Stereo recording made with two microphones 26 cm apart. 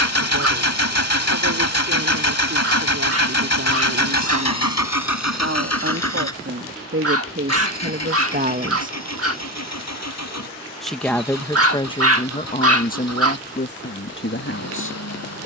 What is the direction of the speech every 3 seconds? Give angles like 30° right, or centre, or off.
70° right, 60° right, 50° right, 10° left, 40° left.